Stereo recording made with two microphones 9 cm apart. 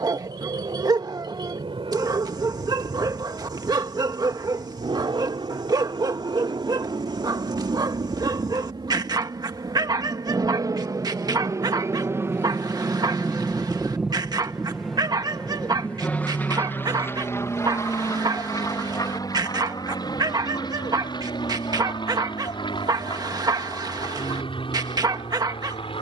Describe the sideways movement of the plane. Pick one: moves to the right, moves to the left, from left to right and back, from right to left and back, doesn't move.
moves to the left.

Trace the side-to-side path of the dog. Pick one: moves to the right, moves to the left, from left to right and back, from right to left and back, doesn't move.
doesn't move.